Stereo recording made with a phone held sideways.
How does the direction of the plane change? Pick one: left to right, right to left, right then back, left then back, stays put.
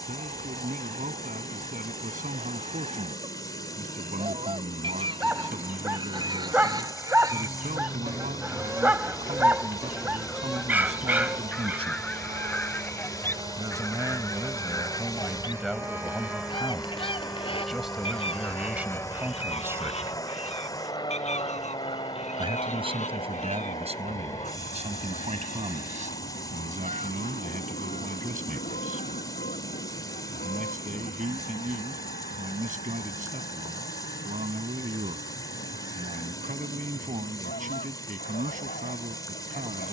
right to left.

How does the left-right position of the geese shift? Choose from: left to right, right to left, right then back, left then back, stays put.
right to left.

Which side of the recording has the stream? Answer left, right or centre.
left.